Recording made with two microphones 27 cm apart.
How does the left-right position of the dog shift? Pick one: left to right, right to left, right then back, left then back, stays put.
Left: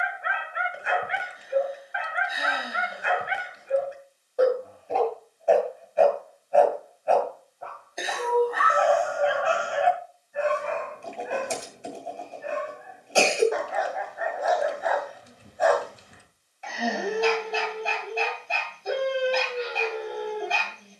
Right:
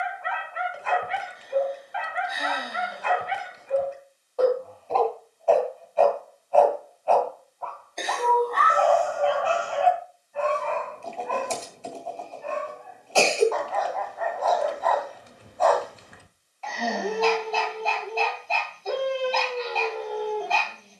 stays put.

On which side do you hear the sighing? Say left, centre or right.
centre.